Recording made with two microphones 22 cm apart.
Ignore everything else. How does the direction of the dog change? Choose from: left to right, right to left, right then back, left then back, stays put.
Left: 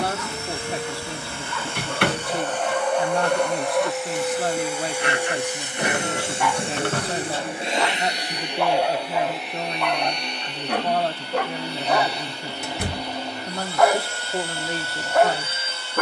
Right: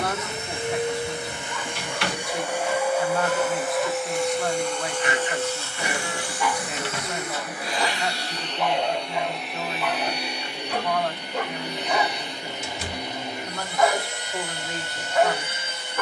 stays put.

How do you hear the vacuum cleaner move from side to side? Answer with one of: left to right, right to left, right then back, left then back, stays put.
left then back.